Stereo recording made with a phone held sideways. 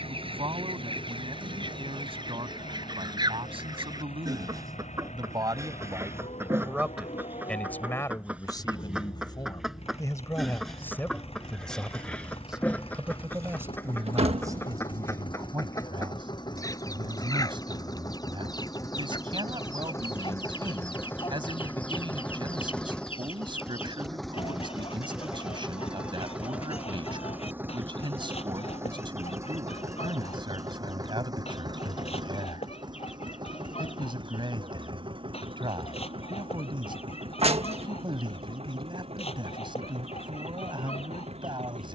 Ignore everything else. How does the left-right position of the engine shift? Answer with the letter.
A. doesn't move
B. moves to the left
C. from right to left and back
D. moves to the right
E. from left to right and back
D.